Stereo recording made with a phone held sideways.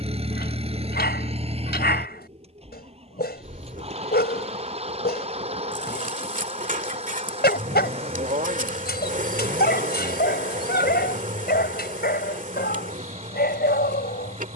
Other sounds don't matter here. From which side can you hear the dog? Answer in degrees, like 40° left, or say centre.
80° left.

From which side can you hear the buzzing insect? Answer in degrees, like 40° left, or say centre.
50° right.